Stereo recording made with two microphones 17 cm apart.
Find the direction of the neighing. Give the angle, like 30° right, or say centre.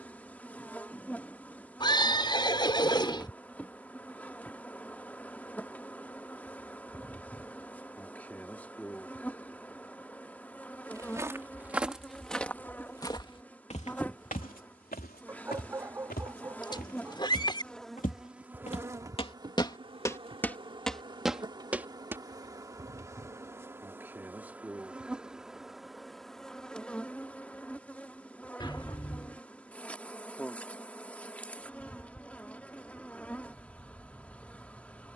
30° left.